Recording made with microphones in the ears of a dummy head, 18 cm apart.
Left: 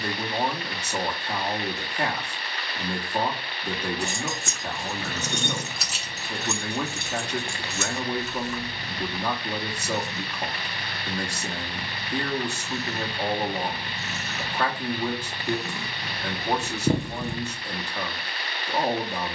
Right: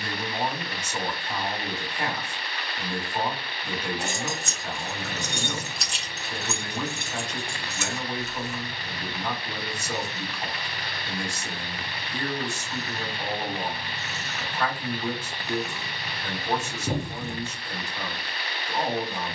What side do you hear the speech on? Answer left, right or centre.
left.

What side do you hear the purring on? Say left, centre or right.
left.